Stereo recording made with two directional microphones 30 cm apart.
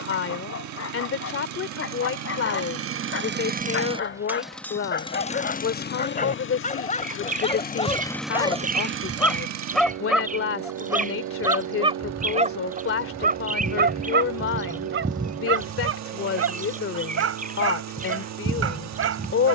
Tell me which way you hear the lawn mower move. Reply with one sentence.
In this clip you hear the lawn mower go left and come back.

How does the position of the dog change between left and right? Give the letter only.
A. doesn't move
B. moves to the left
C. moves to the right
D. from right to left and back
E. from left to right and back
C.